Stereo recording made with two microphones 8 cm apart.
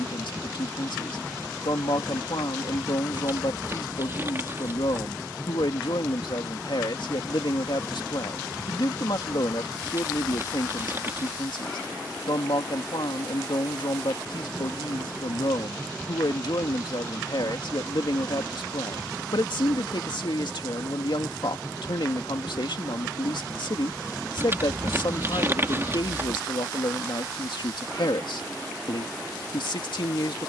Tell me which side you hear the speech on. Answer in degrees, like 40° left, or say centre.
70° left.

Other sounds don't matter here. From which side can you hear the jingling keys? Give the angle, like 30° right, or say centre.
30° right.